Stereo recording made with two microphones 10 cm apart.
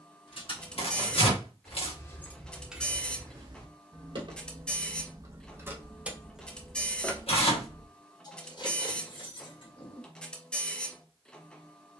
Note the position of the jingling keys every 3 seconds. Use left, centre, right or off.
left, right, left, left.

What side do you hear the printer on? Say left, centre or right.
centre.